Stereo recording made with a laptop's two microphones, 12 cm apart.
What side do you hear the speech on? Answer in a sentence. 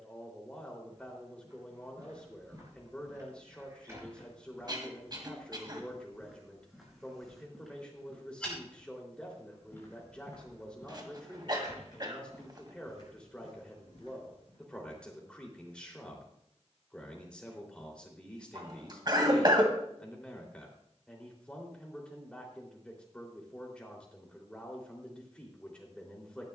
In this clip you hear the speech in the centre.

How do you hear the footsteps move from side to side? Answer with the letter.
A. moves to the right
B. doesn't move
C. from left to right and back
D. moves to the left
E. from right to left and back
D.